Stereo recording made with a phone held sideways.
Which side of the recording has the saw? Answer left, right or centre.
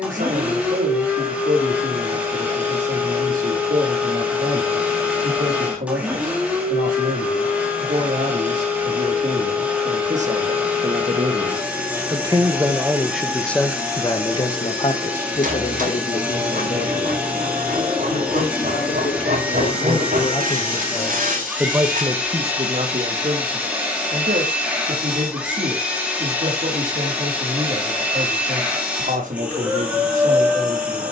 right.